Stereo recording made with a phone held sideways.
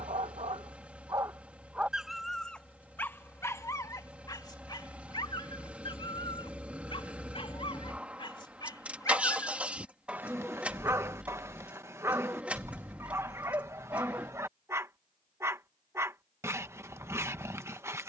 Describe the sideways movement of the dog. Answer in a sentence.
You can hear the dog go left and come back.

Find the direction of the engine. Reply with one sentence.
In this clip you hear the engine in the centre.